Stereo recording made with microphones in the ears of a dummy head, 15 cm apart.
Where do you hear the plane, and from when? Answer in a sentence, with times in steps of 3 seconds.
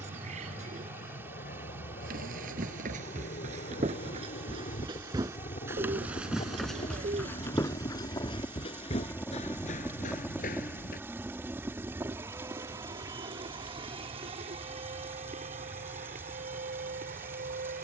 In this clip you hear the plane on the left from 0 s, in the centre from 9 s and on the right from 12 s.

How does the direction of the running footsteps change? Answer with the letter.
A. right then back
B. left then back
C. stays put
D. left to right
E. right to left
E.